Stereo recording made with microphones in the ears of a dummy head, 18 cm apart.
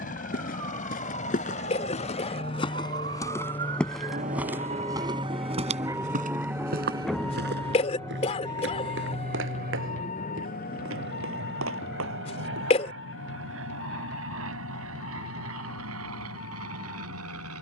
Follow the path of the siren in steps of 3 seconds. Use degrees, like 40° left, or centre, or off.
60° right, 40° right, 10° left, 40° left, 50° left, 60° left.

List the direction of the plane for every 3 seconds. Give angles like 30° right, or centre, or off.
40° left, 10° left, 30° right, 50° right, 70° right, 80° right.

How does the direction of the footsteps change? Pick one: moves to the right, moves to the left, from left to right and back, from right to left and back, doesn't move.
moves to the right.